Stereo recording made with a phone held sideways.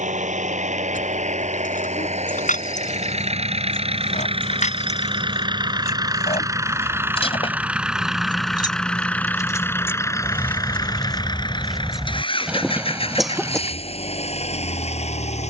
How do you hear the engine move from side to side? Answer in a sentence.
In this clip you hear the engine go from the right side to the left.